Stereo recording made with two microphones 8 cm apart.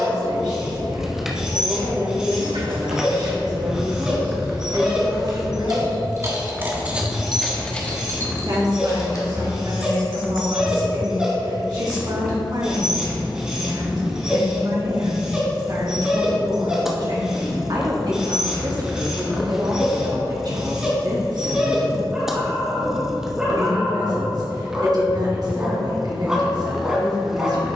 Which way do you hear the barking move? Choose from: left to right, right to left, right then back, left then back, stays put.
stays put.